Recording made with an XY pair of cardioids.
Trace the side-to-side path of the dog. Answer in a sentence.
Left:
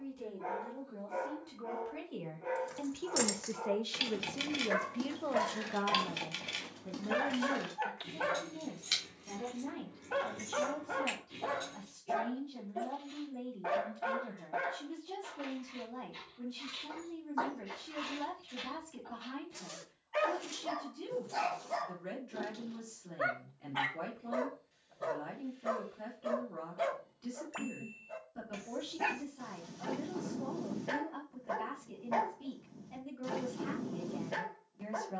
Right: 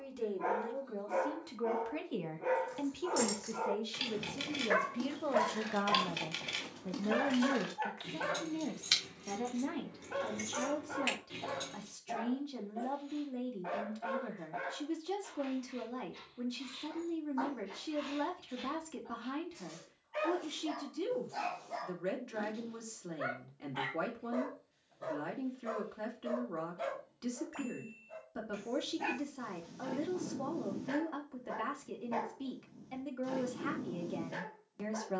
In this clip you hear the dog move to the left.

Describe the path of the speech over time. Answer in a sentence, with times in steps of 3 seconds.
You can hear the speech on the right from 0 s, in the centre from 3 s and on the right from 6 s.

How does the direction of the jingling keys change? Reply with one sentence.
You can hear the jingling keys move from left to right.